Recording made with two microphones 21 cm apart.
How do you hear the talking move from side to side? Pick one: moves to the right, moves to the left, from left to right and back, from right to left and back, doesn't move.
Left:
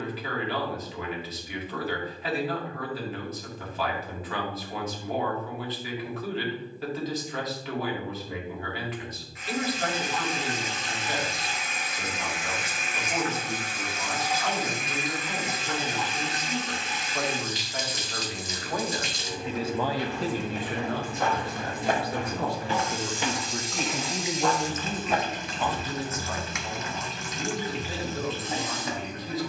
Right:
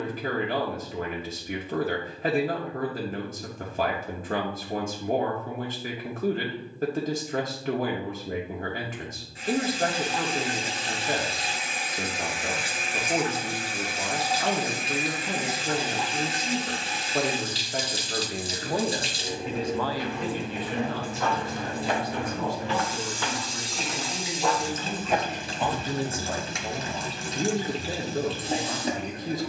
from right to left and back.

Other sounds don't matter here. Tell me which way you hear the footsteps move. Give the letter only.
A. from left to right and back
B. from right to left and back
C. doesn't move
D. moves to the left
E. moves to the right
E.